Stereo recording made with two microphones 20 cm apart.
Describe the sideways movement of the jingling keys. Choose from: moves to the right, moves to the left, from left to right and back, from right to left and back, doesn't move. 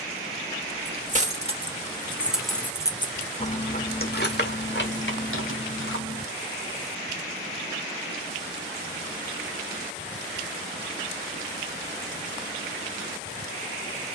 moves to the left.